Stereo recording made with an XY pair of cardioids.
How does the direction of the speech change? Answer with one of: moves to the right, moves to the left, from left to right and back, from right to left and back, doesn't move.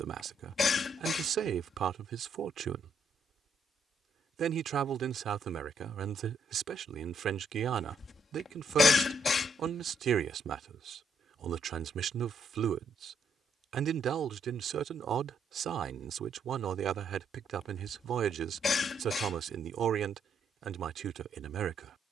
doesn't move.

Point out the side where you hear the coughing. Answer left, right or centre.
left.